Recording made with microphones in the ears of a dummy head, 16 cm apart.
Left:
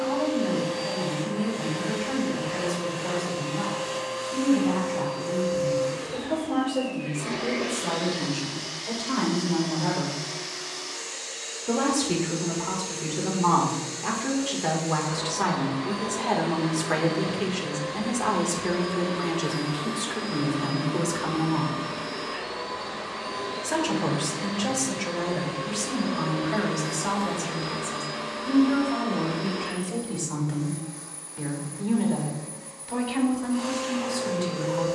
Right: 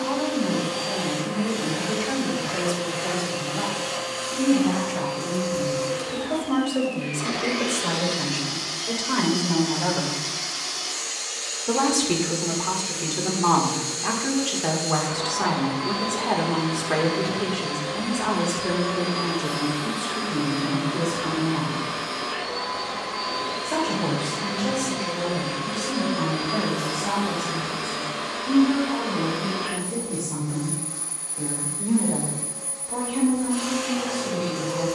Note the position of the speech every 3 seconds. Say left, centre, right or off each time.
right, right, right, right, right, centre, left, left, left, left, left, left.